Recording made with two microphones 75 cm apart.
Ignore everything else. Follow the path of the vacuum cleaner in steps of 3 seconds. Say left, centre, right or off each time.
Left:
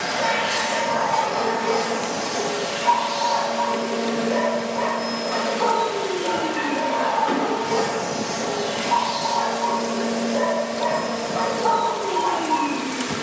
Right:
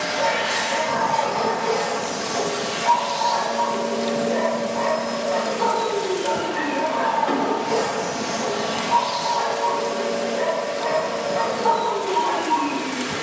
right, left, centre, right, right.